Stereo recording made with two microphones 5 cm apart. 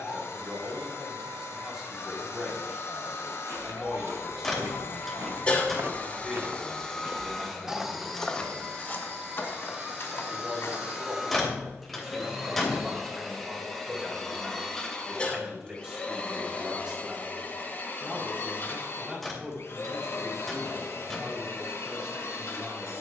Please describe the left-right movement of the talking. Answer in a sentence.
You can hear the talking stay put.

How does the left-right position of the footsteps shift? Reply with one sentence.
In this clip you hear the footsteps go from the right side to the left.